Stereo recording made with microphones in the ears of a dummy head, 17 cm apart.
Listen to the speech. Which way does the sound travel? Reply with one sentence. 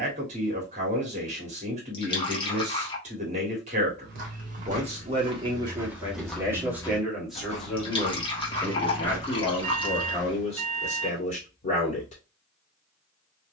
In this clip you hear the speech travel towards the left.